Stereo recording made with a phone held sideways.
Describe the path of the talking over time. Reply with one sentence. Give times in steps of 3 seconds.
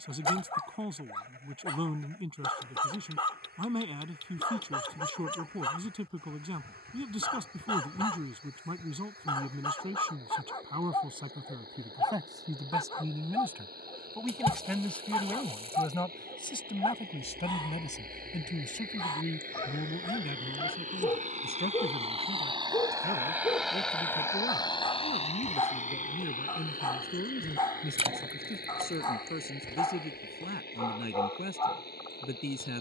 In this clip you hear the talking on the right from 0 s, in the centre from 12 s and on the left from 15 s.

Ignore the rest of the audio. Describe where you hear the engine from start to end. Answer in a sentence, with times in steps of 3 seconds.
You can hear the engine on the right from 0 s and on the left from 24 s.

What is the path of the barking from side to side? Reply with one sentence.
In this clip you hear the barking stay in one place.